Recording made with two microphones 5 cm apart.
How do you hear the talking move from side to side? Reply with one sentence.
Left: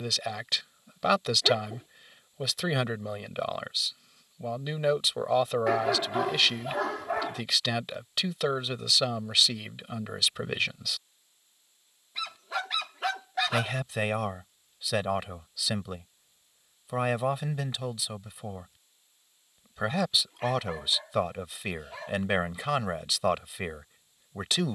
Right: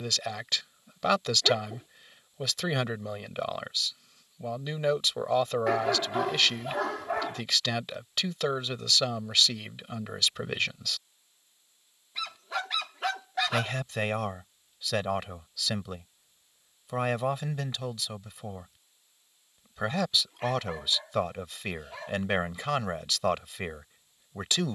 In this clip you hear the talking stay put.